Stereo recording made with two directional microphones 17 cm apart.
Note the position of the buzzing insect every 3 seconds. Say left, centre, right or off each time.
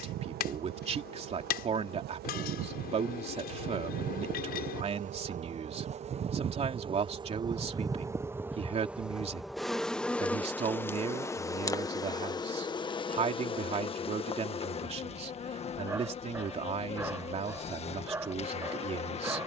right, right, right, centre, left, left, left.